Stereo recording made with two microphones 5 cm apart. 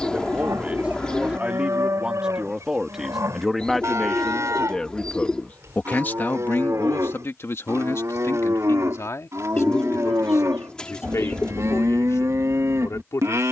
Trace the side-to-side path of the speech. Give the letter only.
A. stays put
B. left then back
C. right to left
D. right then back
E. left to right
C.